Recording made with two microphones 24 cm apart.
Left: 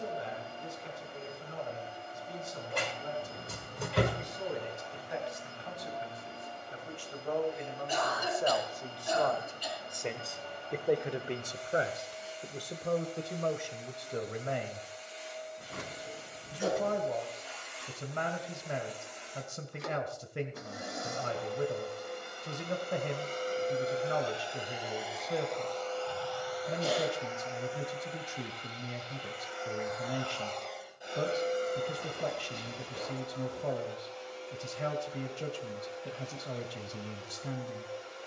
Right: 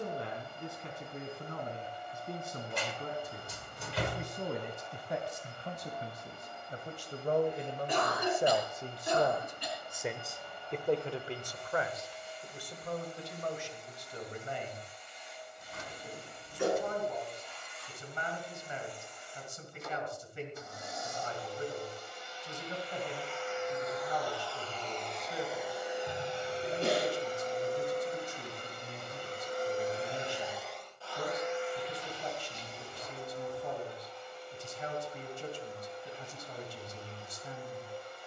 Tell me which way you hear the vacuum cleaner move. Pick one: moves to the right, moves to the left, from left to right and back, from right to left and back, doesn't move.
from left to right and back.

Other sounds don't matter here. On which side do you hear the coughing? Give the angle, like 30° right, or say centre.
60° right.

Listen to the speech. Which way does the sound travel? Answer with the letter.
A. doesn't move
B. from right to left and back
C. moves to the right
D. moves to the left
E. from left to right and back
D.